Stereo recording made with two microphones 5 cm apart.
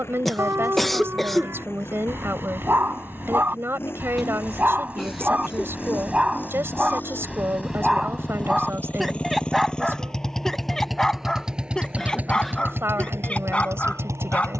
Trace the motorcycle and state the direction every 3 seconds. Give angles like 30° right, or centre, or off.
50° left, 50° left, 40° left, centre, 50° right.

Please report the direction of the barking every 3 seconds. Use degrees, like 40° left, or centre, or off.
50° right, 30° right, 10° right, 10° left, 20° left.